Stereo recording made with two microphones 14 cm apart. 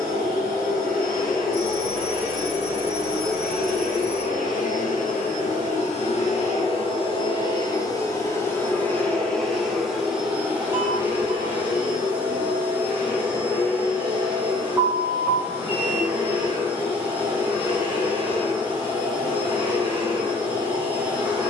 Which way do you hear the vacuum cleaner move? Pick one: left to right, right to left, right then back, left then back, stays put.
left to right.